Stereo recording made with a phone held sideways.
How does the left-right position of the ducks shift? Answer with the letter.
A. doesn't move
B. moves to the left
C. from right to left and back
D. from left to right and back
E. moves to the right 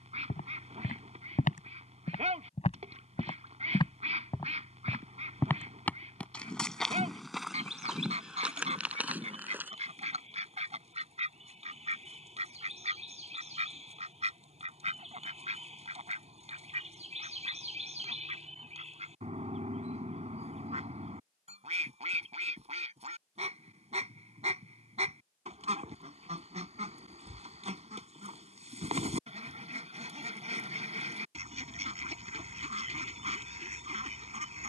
A.